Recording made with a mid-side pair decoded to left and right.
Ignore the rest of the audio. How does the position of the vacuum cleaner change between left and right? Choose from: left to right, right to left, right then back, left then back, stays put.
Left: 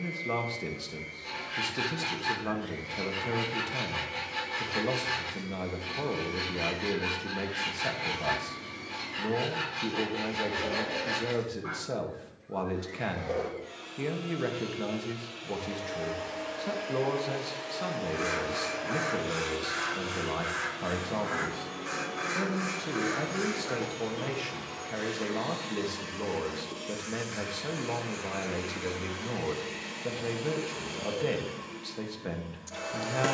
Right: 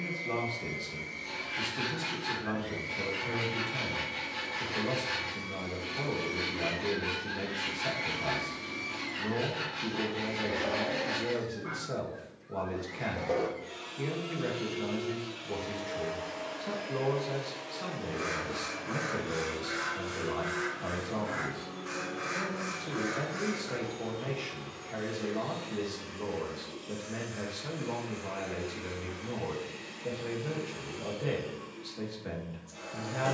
right to left.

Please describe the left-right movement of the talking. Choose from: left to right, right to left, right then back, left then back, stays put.
stays put.